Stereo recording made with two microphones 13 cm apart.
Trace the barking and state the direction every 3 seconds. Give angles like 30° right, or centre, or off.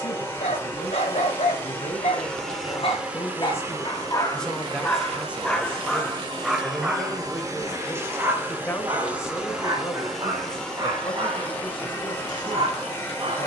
60° left, 20° left, 10° right, 30° right, 40° right.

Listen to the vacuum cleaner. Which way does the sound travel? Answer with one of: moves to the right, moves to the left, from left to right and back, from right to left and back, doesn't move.
from left to right and back.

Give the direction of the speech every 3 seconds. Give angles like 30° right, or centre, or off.
40° left, centre, 10° left, 30° left, 40° left.